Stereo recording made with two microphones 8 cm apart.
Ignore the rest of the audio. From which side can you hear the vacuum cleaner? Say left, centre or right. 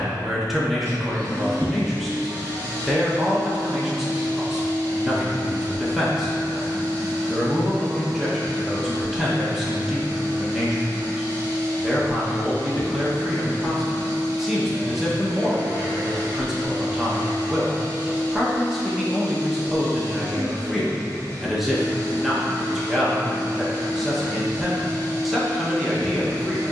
right.